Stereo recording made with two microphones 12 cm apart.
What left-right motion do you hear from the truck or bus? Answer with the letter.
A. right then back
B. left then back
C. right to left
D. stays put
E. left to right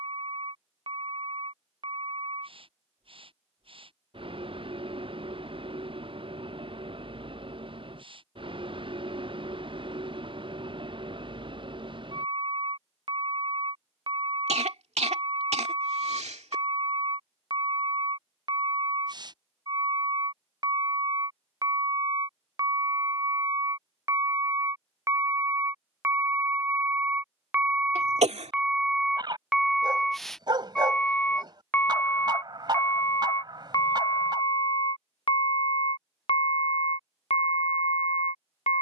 C.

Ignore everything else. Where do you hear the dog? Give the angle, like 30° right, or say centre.
40° right.